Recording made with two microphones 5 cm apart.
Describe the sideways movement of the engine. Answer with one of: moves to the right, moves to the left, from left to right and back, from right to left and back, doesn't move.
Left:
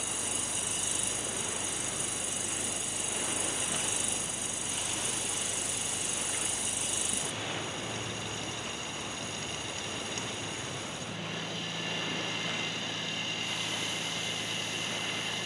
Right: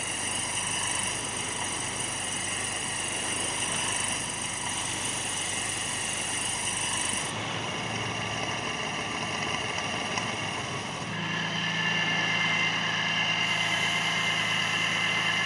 doesn't move.